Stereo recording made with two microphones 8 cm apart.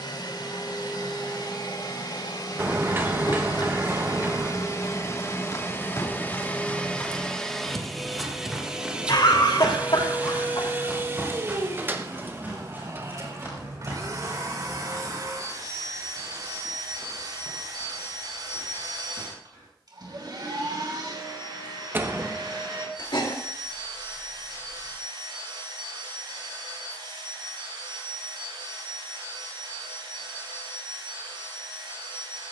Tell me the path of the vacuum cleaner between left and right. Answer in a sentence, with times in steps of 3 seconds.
In this clip you hear the vacuum cleaner on the left from 0 s, in the centre from 6 s and on the right from 9 s.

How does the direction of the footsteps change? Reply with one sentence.
In this clip you hear the footsteps move from left to right.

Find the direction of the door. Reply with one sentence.
You can hear the door on the right.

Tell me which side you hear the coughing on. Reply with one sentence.
In this clip you hear the coughing on the left.